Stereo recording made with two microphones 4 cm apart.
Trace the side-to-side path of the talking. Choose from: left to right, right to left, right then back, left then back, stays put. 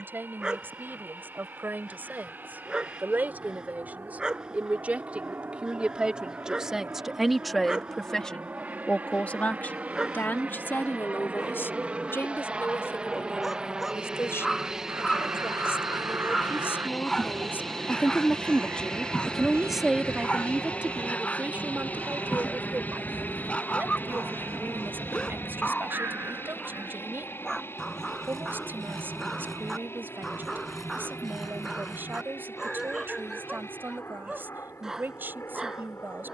left then back.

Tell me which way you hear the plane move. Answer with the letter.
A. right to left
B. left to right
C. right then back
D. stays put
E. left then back
A.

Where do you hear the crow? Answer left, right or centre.
right.